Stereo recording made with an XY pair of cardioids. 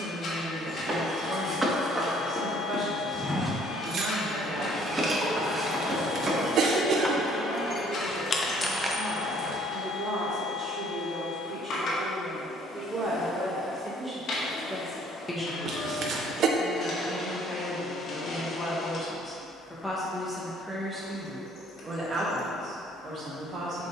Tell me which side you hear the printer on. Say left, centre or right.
left.